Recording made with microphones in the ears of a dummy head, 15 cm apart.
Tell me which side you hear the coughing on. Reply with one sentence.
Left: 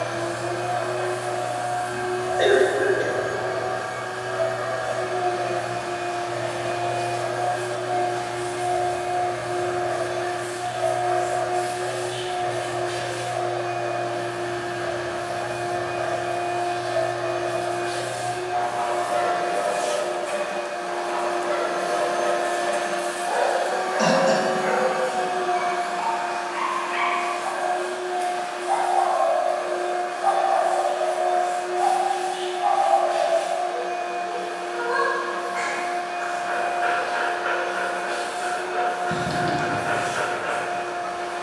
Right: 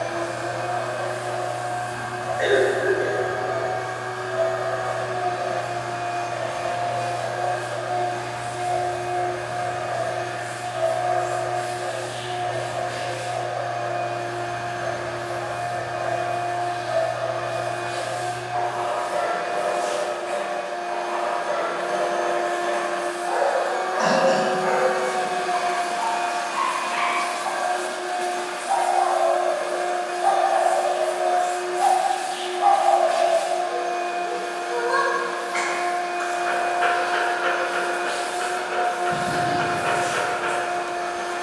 In this clip you hear the coughing on the left.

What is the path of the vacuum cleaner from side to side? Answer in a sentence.
In this clip you hear the vacuum cleaner travel towards the right.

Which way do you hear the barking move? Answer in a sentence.
You can hear the barking move from left to right.